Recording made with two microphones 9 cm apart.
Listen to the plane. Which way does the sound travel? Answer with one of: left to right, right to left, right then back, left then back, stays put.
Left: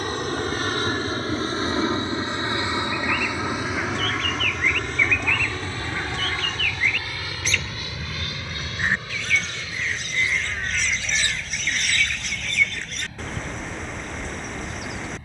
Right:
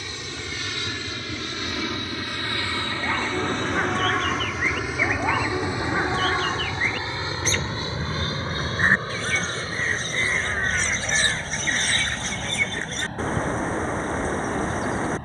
left to right.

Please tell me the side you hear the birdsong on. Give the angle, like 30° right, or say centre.
40° right.